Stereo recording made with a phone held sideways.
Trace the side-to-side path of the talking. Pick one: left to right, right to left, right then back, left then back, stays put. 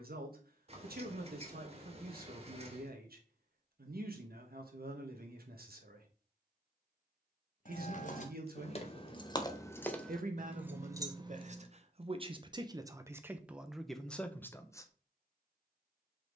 right to left.